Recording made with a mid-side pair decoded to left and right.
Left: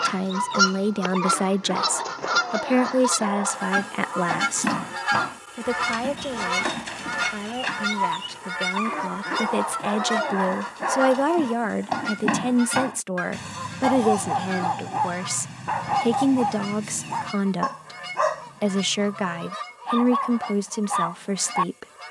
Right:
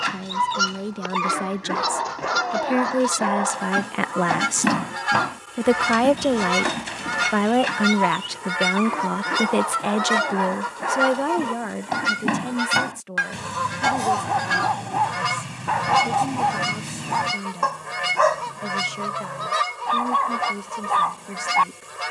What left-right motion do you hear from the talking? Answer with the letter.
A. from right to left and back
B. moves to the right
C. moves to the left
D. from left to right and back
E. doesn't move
D.